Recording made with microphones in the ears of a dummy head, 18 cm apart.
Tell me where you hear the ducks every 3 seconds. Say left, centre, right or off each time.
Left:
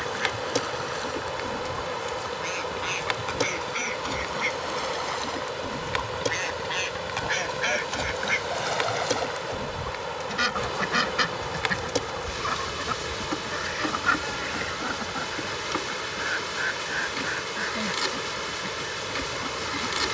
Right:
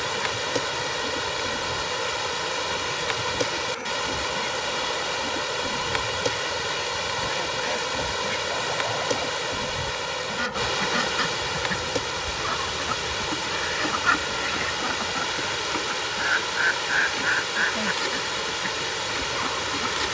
left, left, left, left, centre, right, right.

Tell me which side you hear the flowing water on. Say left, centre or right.
right.